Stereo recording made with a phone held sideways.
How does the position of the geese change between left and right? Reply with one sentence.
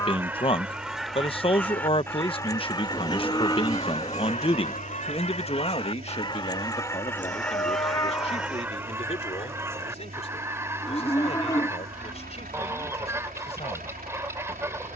You can hear the geese move from right to left and back again.